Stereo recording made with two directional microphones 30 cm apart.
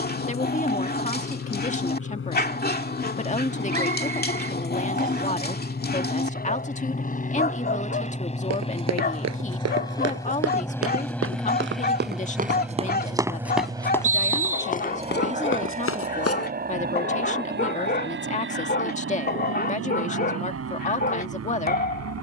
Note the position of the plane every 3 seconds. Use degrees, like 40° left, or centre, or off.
50° left, 40° left, 30° left, 10° left, 10° right, 30° right, 40° right, 50° right.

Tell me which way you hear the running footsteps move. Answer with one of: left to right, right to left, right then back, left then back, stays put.
right to left.